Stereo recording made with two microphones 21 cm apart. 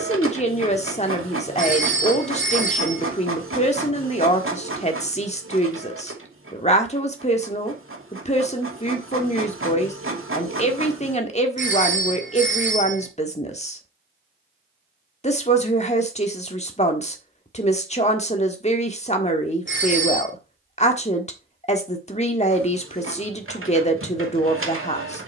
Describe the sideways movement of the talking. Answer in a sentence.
In this clip you hear the talking stay put.